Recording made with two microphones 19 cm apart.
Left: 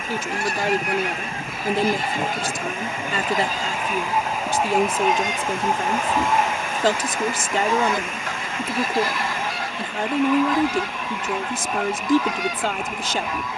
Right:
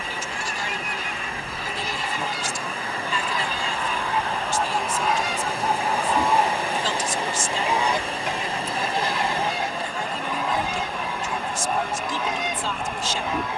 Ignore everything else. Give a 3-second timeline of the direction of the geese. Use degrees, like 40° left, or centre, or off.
60° left, 30° left, 10° right, 20° right, 20° right.